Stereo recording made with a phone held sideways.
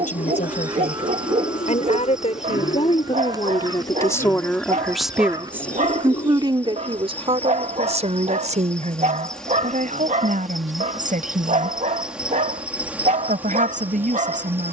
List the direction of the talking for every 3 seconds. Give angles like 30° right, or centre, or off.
60° left, 10° left, 40° right, 60° right, 60° right.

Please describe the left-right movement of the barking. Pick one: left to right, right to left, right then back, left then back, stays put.
stays put.